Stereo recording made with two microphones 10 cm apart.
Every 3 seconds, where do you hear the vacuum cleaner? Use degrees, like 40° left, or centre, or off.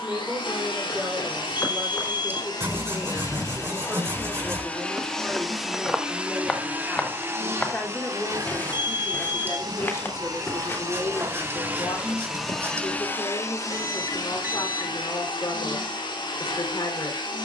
60° left, 20° left, 30° right, 40° right, 30° left, 60° left.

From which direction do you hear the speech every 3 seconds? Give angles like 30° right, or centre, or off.
20° right, centre, 20° left, 40° left, 50° left, 50° left.